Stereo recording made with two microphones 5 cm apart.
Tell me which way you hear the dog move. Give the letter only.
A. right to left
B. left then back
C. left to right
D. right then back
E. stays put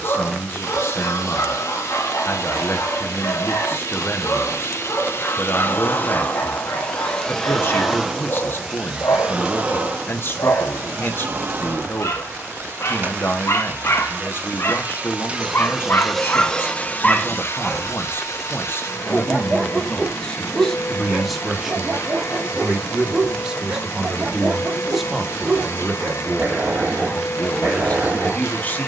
C.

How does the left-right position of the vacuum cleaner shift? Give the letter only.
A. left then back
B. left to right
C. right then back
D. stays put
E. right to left
C.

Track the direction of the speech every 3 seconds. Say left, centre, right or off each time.
left, left, left, left, left, left, left, centre, centre, left.